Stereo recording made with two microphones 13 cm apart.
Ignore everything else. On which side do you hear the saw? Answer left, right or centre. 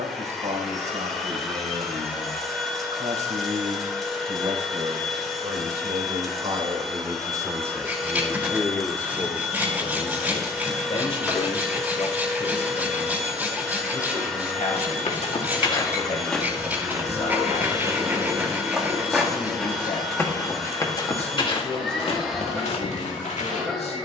centre.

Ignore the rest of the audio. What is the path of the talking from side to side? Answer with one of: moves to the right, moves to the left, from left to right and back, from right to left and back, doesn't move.
moves to the left.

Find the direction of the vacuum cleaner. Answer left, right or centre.
centre.